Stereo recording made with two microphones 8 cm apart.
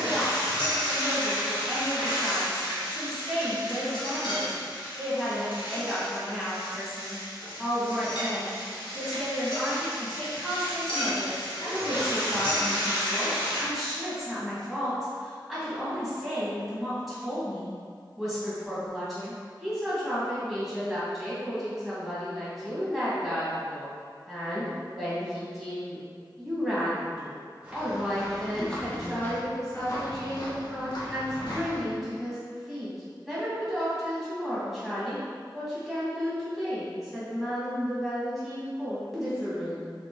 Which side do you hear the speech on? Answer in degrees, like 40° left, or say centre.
centre.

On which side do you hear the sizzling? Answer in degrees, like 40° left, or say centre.
80° left.